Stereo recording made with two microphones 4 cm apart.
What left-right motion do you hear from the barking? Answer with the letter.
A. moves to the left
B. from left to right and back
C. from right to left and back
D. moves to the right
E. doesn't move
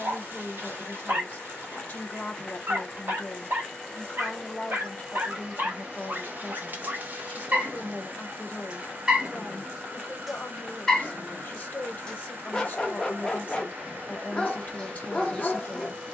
A.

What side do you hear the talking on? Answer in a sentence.
You can hear the talking on the left.